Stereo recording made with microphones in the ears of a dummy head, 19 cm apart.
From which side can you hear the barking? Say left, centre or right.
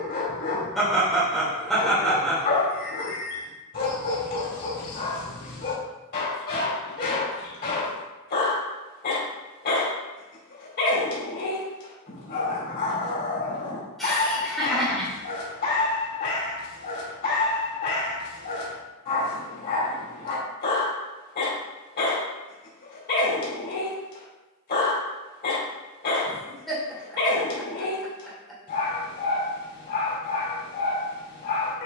left.